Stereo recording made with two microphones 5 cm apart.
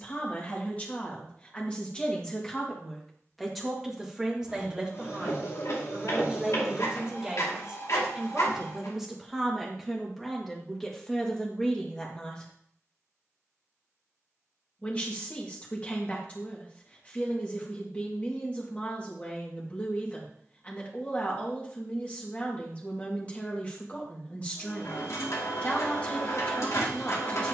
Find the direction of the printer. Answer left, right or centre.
left.